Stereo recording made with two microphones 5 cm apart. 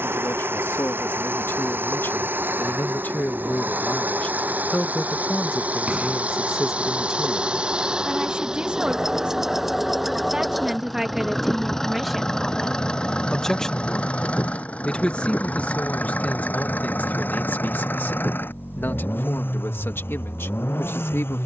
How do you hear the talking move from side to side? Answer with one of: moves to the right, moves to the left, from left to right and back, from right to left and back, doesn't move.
from left to right and back.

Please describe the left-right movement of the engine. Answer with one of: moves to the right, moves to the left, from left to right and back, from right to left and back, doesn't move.
moves to the left.